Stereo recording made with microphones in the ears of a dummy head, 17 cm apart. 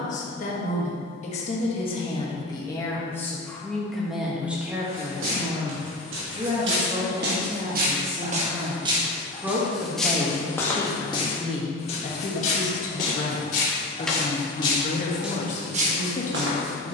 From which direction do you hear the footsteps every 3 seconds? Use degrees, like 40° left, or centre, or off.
off, 80° right, 50° right, 10° left, 40° left, 40° right.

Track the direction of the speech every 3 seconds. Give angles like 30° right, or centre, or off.
30° left, centre, 30° right, 10° left, 40° left, 40° left.